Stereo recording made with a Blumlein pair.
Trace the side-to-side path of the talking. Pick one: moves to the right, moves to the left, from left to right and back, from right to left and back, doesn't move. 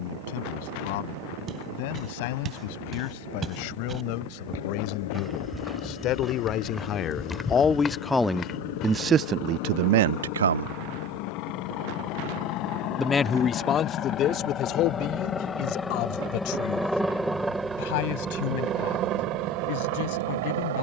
from left to right and back.